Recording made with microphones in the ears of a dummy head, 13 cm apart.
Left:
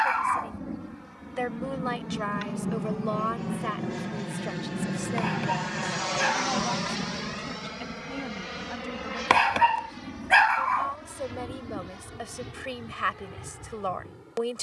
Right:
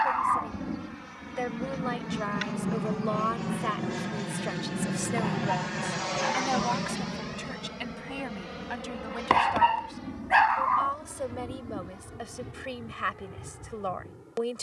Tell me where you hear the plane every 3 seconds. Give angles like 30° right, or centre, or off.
50° right, 10° right, 30° left, 50° left, 60° left.